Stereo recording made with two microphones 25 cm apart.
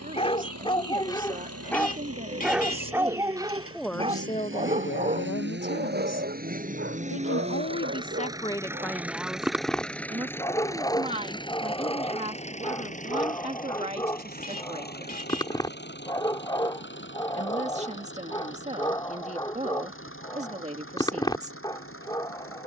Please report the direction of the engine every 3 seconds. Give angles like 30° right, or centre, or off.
70° right, 50° right, 20° right, 10° left, 30° left, 40° left, 50° left, 60° left.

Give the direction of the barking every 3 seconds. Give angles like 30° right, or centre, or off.
10° left, 30° right, 40° right, 10° left, 20° left, 20° left, 20° left, 20° left.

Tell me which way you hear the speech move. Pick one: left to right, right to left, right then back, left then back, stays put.
left then back.